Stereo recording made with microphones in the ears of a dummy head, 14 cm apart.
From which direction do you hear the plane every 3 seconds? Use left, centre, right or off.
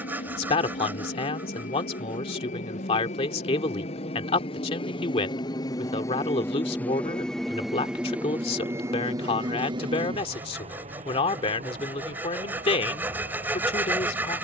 left, left, centre, right, right.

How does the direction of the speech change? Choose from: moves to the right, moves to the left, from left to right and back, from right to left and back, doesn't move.
doesn't move.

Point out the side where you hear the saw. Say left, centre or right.
centre.